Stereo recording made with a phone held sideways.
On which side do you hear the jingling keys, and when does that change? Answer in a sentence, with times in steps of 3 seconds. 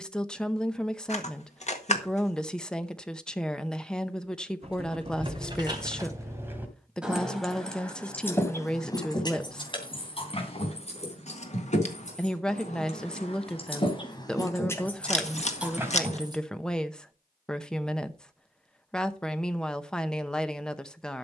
You can hear the jingling keys not at all from 0 s, on the right from 3 s, in the centre from 6 s, on the left from 9 s, in the centre from 15 s and not at all from 18 s.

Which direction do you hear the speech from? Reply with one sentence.
In this clip you hear the speech in the centre.